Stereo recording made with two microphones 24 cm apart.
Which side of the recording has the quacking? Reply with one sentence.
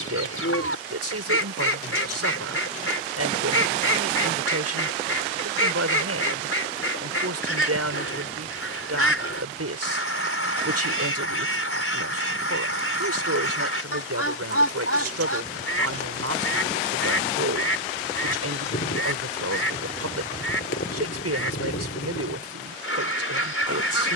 You can hear the quacking on the left.